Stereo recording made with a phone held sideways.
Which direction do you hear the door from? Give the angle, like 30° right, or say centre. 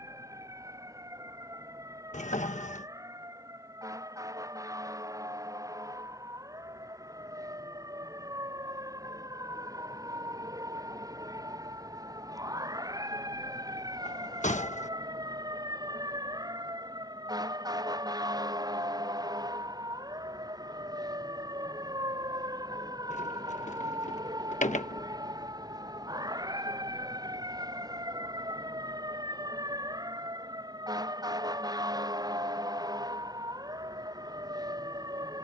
50° left.